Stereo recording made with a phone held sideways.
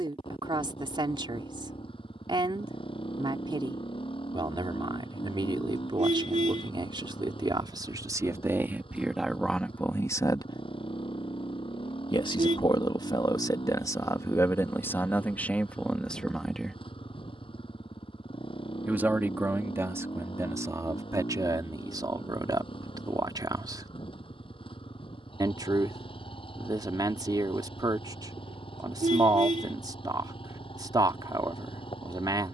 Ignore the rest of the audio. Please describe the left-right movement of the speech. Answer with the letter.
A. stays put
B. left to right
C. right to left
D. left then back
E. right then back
D.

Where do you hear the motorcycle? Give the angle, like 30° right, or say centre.
40° left.